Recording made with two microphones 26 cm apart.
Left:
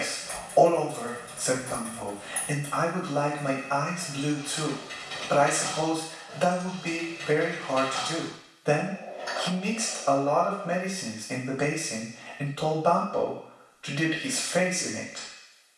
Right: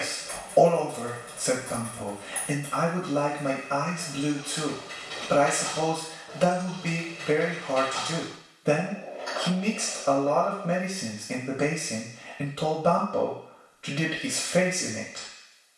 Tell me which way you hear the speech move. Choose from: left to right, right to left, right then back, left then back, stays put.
stays put.